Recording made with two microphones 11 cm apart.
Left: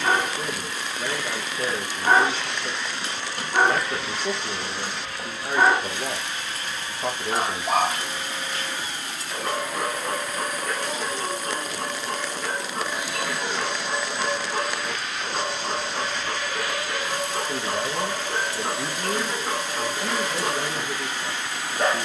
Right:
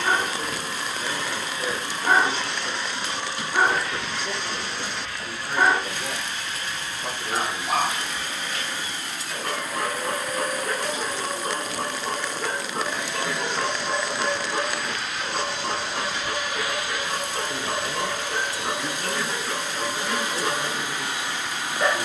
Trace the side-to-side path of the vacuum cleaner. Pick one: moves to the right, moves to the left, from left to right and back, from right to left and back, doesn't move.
from right to left and back.